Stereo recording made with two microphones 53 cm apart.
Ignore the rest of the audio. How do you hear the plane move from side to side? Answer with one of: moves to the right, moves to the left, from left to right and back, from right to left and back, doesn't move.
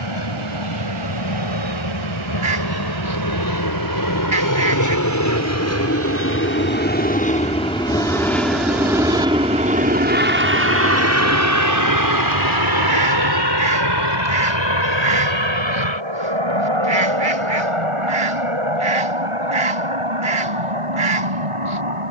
moves to the right.